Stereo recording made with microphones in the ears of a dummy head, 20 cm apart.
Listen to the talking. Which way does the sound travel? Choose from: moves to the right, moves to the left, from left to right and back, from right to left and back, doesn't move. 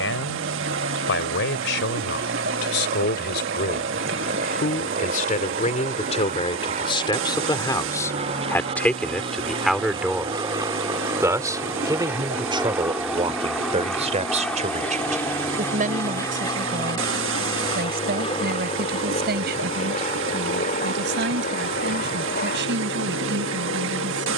moves to the right.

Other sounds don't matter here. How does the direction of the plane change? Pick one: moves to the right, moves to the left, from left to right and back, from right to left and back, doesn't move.
moves to the left.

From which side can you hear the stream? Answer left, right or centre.
right.